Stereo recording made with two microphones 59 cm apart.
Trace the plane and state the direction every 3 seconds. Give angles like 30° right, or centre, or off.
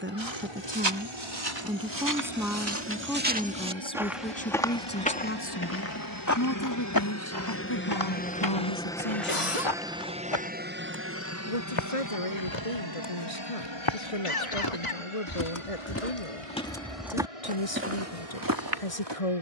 60° left, 50° left, 20° left, 10° right, 40° right, 60° right, 60° right.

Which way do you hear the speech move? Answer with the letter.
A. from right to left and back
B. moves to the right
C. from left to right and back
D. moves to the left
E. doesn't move
D.